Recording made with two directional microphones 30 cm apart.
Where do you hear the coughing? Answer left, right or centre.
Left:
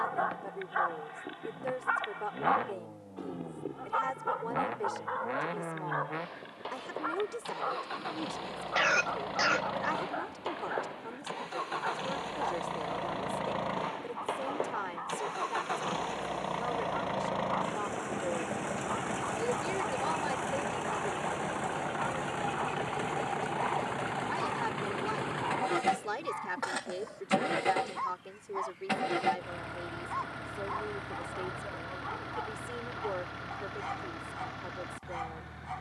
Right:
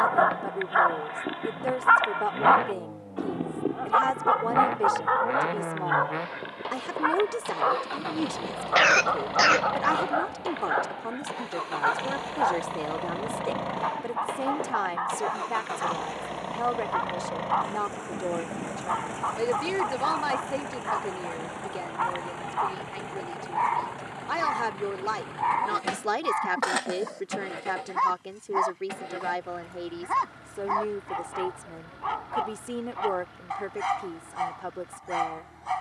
right.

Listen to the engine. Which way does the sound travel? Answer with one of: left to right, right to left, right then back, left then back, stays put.
right to left.